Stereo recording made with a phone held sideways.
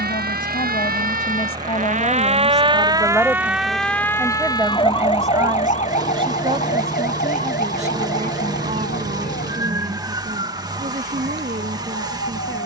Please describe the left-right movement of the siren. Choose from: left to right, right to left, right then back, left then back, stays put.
right to left.